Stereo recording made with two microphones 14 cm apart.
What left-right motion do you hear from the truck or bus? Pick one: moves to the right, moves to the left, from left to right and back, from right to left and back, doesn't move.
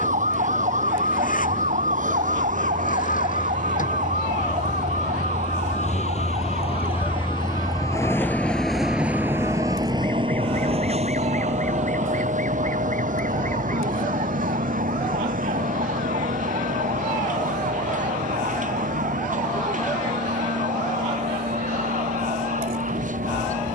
moves to the right.